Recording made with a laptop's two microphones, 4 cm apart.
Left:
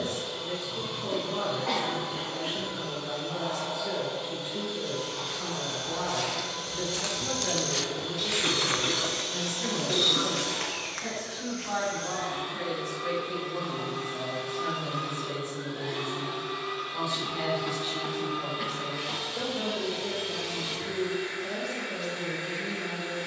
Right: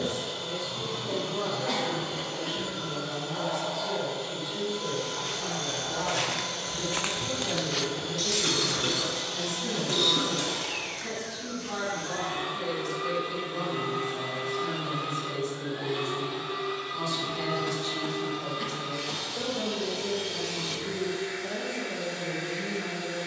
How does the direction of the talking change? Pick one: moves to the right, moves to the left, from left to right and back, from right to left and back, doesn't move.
moves to the right.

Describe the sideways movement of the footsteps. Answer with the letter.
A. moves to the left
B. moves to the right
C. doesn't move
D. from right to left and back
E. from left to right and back
A.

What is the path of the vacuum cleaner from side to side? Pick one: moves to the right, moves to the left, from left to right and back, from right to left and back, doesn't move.
moves to the left.